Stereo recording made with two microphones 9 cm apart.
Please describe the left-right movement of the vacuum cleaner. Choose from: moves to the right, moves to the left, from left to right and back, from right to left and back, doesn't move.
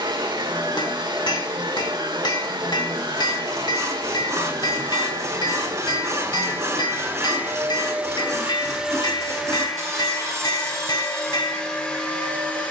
moves to the left.